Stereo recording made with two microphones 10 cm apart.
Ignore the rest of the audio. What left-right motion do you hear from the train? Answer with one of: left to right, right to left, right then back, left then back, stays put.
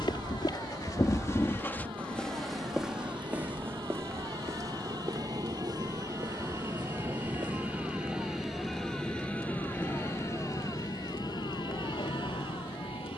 right to left.